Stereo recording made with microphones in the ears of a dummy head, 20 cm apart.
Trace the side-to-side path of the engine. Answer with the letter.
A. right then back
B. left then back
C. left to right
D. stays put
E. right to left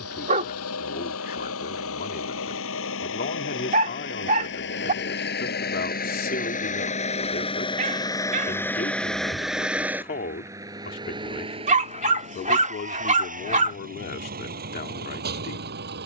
C.